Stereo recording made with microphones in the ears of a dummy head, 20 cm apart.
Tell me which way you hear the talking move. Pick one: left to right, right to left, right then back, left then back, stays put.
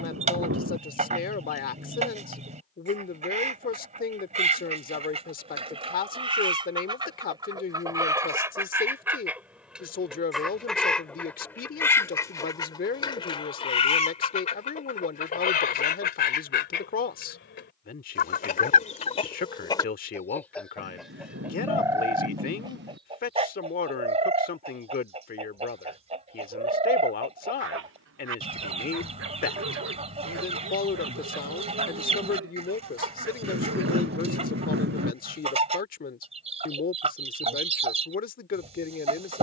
stays put.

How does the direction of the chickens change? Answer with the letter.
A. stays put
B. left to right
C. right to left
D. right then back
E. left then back
E.